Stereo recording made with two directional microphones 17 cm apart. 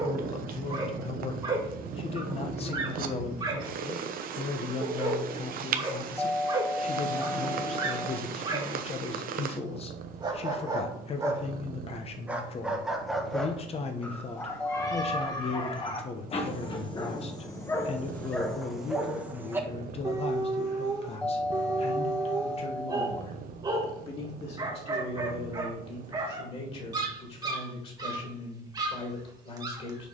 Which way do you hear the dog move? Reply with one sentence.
In this clip you hear the dog go left and come back.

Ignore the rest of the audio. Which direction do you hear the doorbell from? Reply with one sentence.
You can hear the doorbell in the centre.